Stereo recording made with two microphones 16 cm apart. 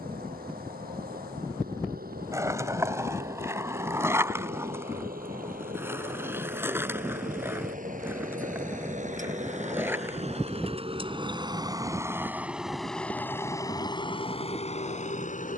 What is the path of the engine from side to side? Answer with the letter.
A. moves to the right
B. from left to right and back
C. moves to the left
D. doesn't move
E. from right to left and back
C.